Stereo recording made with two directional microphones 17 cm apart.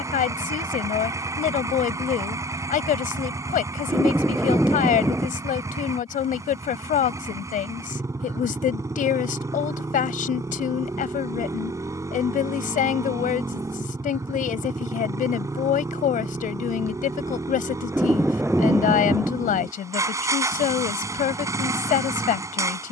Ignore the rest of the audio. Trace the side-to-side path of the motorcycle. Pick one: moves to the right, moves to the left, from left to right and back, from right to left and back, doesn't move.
doesn't move.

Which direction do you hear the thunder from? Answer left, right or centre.
centre.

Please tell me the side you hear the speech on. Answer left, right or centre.
left.